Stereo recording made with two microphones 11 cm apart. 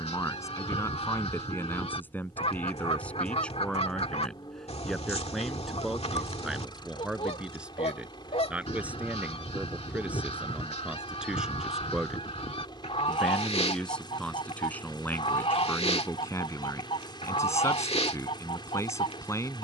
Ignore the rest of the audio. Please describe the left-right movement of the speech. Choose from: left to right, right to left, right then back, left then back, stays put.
right then back.